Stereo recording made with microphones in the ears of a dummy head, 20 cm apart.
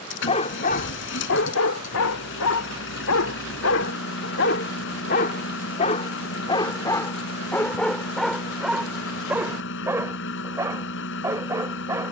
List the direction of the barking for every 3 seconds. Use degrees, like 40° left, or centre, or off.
60° left, 50° left, 10° left, 10° right.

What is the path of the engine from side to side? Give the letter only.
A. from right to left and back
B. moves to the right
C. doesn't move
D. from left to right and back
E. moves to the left
C.